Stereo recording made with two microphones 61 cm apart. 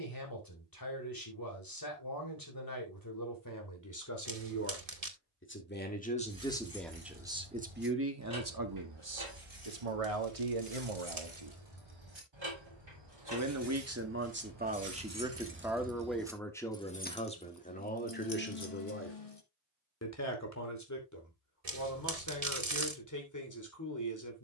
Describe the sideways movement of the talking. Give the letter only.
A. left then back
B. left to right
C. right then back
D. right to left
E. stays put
C.